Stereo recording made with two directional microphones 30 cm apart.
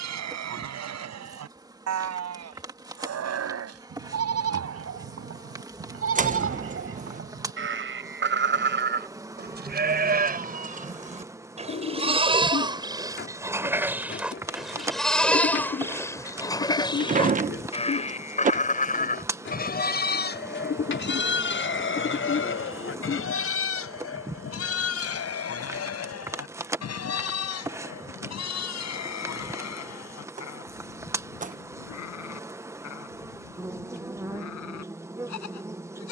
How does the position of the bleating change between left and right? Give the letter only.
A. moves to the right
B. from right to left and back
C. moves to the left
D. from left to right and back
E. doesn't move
C.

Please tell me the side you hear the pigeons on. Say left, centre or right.
left.